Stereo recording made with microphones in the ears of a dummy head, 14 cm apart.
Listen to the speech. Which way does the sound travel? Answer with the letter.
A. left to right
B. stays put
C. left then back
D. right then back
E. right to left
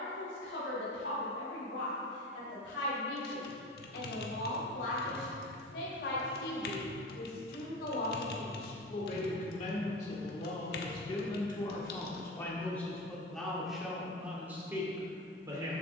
A.